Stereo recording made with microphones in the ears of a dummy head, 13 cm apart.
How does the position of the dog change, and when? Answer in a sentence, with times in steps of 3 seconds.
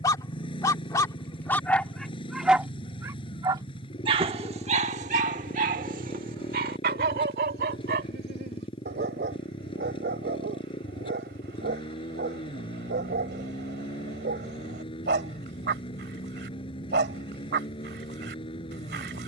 You can hear the dog in the centre from 0 s and on the right from 3 s.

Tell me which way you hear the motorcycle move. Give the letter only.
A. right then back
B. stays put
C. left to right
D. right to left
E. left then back
B.